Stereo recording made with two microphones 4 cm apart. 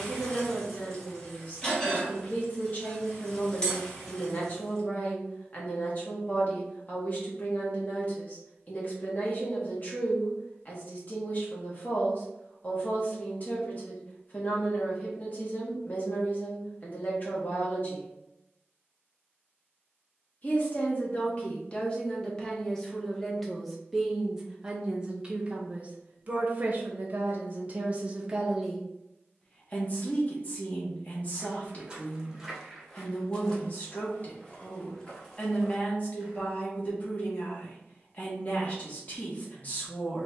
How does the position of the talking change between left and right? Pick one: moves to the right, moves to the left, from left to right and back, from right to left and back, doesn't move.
from left to right and back.